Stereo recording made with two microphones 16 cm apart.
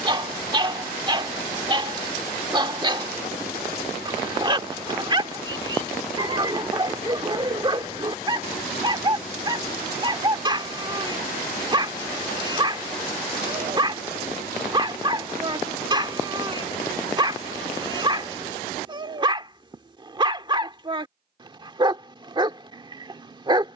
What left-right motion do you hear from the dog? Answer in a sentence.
In this clip you hear the dog stay put.